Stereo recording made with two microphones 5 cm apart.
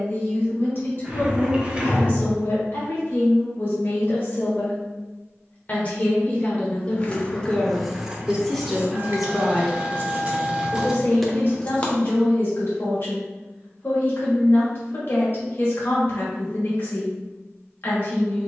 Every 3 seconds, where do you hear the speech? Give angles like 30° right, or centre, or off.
50° left, 40° left, 20° left, 30° left, 50° left, 50° left.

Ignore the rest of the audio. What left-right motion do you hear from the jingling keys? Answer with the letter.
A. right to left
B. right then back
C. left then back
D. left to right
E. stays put
B.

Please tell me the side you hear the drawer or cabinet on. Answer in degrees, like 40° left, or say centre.
20° right.